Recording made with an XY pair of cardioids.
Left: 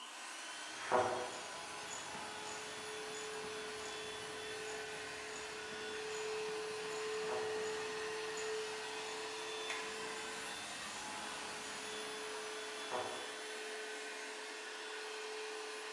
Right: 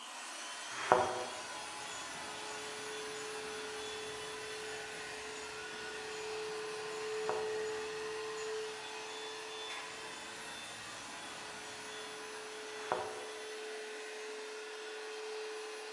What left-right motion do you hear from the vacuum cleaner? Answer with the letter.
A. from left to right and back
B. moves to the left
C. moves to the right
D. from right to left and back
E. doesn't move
B.